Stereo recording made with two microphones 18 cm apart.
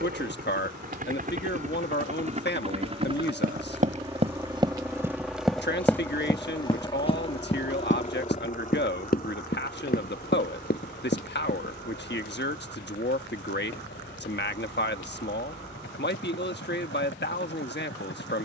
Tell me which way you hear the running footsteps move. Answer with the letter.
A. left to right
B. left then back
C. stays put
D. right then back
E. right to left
E.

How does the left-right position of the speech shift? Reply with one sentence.
In this clip you hear the speech stay put.